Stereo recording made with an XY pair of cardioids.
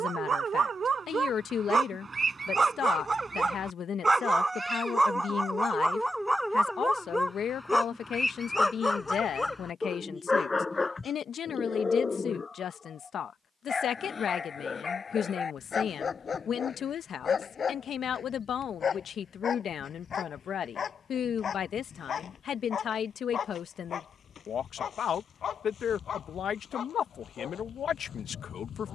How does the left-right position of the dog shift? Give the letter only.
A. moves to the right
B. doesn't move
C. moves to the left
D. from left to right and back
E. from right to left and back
C.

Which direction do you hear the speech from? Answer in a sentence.
In this clip you hear the speech on the left.